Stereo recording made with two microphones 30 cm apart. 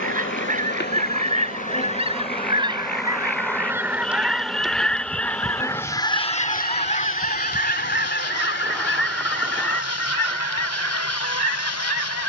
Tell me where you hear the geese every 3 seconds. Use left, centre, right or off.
right, centre, left, left.